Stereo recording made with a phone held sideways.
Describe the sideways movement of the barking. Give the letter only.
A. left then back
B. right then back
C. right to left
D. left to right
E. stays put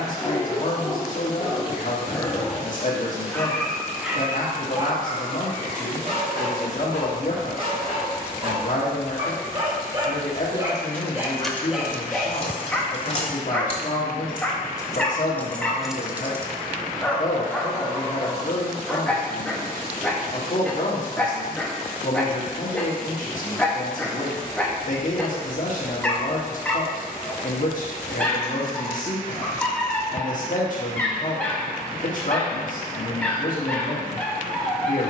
B.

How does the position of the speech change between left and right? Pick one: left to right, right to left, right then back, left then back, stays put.
stays put.